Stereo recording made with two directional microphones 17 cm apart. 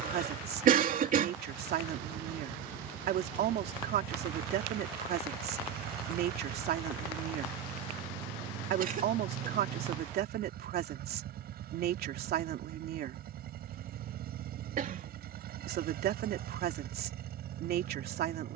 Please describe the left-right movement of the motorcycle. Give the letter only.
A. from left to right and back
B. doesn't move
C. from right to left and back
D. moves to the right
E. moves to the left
B.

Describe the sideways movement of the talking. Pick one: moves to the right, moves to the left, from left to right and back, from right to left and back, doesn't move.
doesn't move.